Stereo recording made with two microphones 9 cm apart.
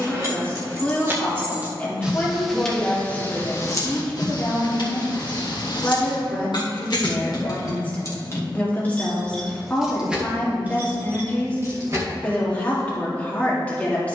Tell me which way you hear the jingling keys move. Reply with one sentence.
You can hear the jingling keys go left and come back.